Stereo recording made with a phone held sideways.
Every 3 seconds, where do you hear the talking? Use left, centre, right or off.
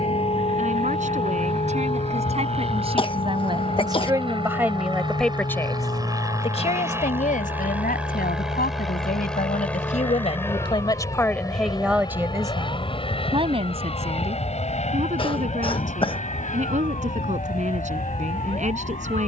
right, centre, left, left, right, right, right.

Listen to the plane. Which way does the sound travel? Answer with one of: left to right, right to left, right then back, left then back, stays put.
right to left.